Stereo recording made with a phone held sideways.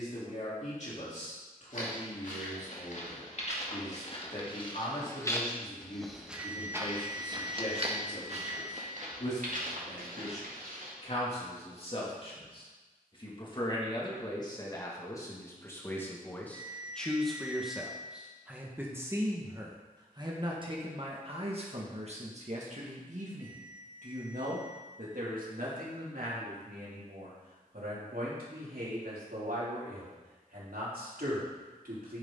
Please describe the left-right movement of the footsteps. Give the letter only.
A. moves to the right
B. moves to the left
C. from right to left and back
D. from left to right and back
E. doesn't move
A.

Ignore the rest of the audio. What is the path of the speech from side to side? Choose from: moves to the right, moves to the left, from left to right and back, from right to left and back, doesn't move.
moves to the right.